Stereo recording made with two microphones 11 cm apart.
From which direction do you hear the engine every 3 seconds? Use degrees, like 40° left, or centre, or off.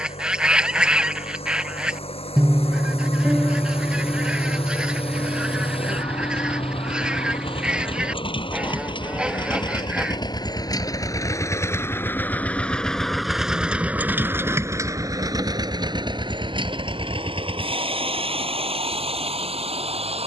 70° left, 70° left, 60° left, 40° left, 10° right, 50° right, 70° right.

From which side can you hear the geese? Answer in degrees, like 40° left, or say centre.
10° right.